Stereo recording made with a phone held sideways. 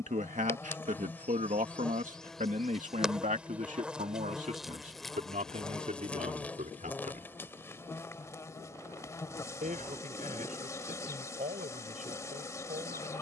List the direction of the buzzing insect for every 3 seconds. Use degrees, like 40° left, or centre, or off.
10° left, centre, 20° left, 20° left, 20° left.